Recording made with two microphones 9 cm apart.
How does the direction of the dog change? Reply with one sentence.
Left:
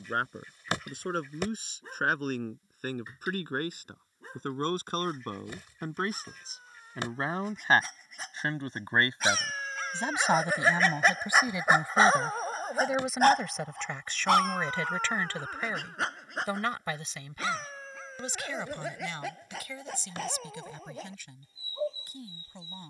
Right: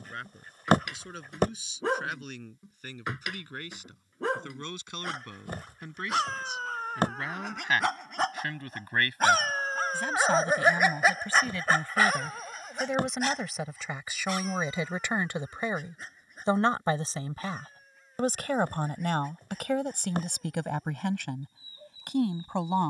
You can hear the dog move from right to left.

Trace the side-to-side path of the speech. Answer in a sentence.
In this clip you hear the speech move from left to right.